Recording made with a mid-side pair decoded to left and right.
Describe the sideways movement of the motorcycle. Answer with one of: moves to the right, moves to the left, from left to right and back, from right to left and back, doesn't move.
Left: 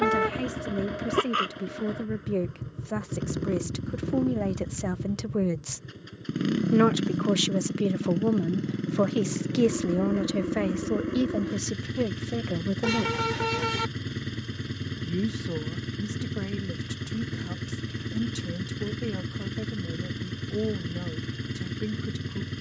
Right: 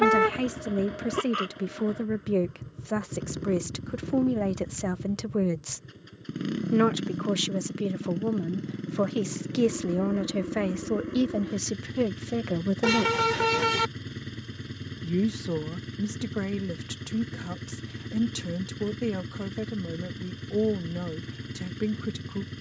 doesn't move.